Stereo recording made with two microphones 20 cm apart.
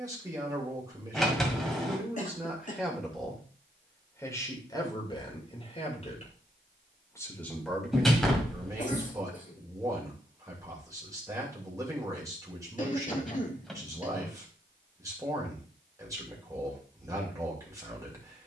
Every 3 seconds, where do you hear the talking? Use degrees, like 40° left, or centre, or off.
10° right, 20° left, 10° left, 20° right, 20° right, 20° right.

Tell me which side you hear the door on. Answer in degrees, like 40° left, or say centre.
centre.